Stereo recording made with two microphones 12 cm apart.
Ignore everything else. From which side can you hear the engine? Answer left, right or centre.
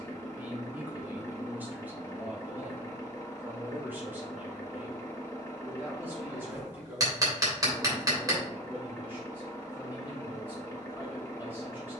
left.